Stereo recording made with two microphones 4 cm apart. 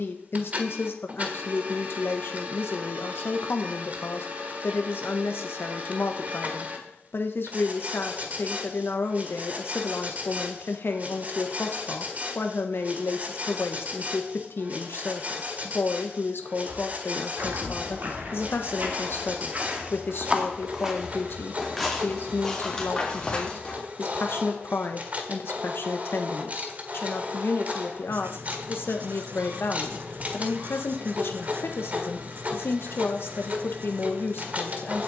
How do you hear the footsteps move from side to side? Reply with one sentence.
You can hear the footsteps move to the left.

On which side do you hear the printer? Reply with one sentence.
You can hear the printer on the right.